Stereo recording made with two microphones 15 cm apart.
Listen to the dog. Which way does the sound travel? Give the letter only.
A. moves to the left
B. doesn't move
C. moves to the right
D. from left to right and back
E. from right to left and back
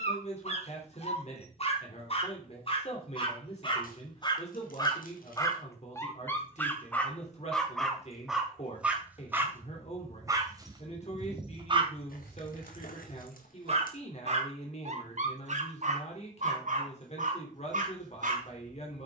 C.